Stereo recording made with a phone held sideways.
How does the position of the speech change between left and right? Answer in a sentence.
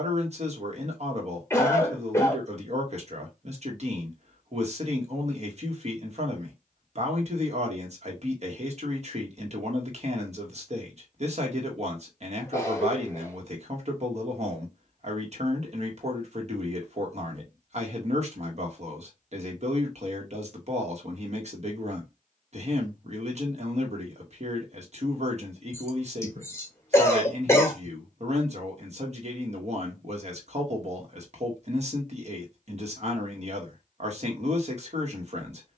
You can hear the speech stay put.